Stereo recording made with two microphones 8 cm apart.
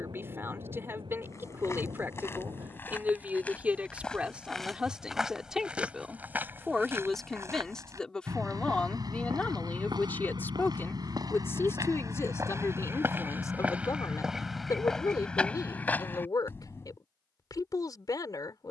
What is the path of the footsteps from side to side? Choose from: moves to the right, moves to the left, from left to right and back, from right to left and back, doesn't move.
from left to right and back.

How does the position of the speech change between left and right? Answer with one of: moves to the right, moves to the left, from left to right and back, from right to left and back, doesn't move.
moves to the left.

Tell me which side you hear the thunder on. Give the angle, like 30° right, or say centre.
70° right.